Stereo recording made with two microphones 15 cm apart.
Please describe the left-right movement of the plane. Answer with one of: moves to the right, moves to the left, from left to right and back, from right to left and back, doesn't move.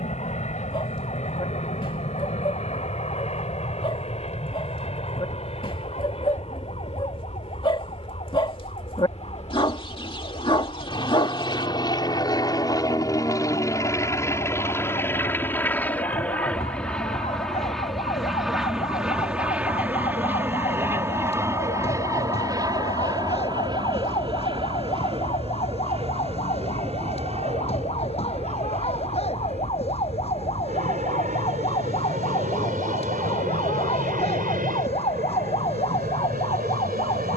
moves to the right.